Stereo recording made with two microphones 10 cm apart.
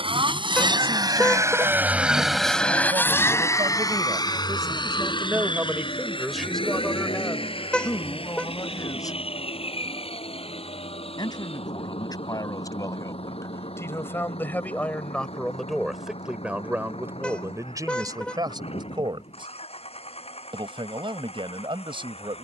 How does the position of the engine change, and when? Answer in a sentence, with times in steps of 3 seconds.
In this clip you hear the engine on the right from 0 s and on the left from 3 s.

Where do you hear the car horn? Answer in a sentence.
You can hear the car horn in the centre.